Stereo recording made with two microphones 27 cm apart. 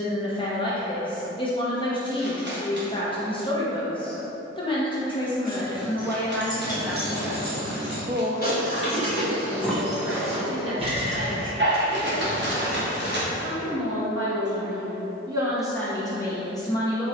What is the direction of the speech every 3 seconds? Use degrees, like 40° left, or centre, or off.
20° left, 20° left, 10° right, 50° right, 50° right, 10° left.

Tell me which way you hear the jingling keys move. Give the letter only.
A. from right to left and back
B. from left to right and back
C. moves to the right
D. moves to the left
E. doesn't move
A.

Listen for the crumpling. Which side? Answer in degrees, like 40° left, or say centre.
40° right.